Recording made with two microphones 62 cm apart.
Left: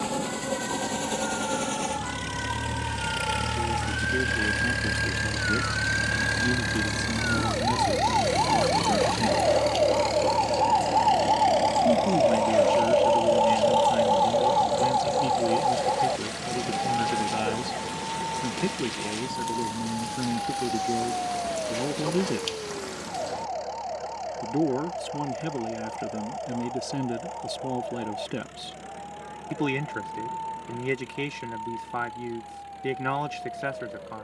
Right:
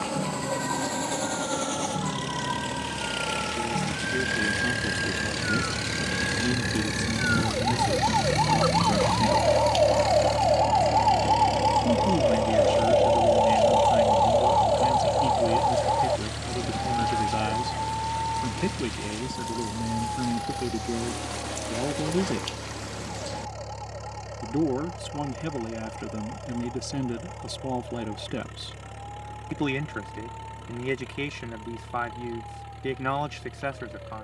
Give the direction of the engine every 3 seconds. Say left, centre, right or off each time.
left, left, centre, right, right, right, right, right, right, right, right, right.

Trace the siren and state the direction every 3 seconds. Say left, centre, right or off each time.
right, right, right, centre, left, left, left, left, left, left, left, left.